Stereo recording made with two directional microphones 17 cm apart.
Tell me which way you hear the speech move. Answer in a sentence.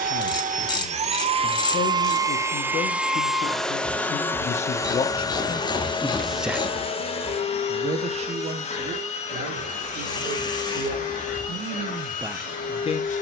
You can hear the speech move from left to right and back again.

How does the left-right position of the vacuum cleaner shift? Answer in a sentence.
In this clip you hear the vacuum cleaner go from the right side to the left.